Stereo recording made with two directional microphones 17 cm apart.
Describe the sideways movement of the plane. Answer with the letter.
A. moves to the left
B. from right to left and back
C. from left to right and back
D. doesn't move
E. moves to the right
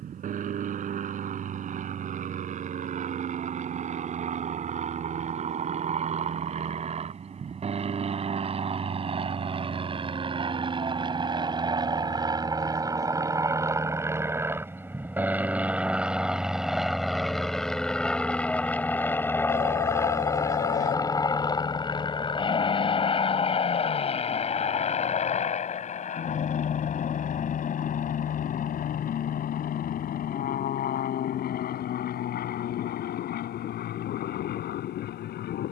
A.